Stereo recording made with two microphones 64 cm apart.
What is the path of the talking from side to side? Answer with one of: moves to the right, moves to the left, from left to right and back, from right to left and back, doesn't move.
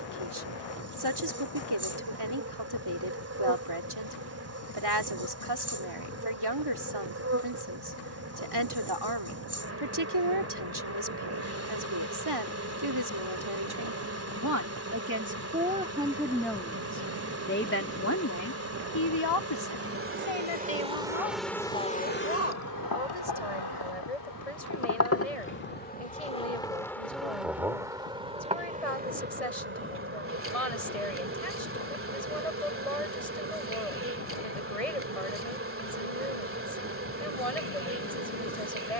moves to the left.